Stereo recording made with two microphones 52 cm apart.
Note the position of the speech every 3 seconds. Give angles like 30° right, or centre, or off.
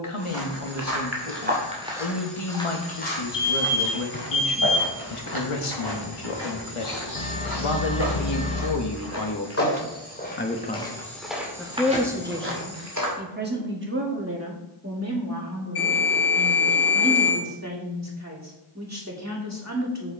70° left, 70° left, 60° left, 20° left, 20° right, 30° right, 30° right.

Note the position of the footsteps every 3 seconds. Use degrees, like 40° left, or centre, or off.
20° right, 30° left, 40° left, 10° left, 30° right, off, off.